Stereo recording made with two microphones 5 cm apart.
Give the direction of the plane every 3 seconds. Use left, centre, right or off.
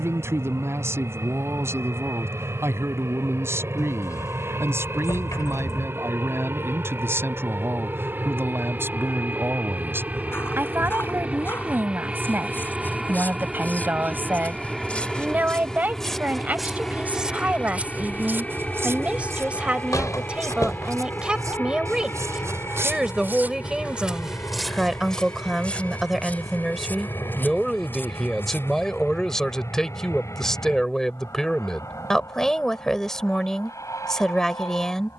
right, right, right, right, centre, centre, left, left, left, left, left, left.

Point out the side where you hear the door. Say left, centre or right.
left.